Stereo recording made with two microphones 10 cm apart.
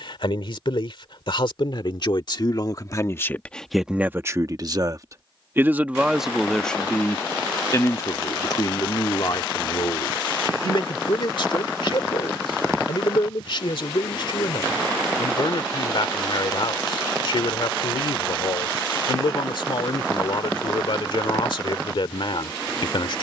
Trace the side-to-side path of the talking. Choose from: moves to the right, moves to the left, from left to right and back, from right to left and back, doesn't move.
from left to right and back.